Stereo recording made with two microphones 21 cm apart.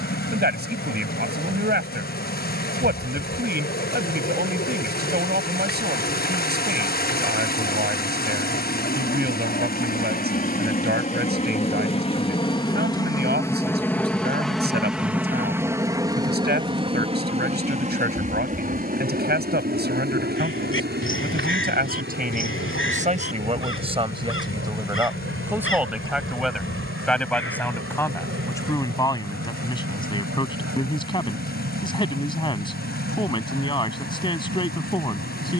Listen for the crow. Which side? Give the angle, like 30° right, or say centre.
80° left.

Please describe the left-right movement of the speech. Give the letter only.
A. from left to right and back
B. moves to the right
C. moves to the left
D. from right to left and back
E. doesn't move
C.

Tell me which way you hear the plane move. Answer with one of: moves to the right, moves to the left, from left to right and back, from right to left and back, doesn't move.
moves to the right.